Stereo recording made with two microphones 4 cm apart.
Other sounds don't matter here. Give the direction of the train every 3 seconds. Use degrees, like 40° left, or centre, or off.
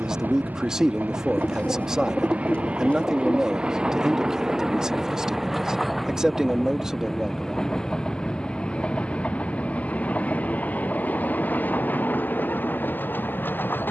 40° right, 10° right, 10° left, 40° left, 50° left.